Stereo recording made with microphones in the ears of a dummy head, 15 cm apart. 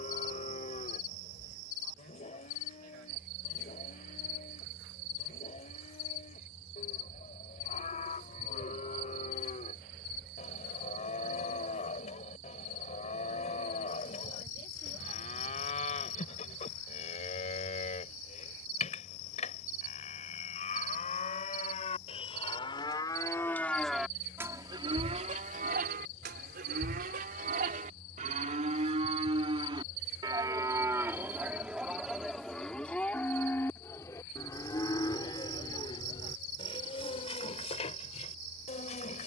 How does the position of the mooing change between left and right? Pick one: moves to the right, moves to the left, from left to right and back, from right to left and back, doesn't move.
from left to right and back.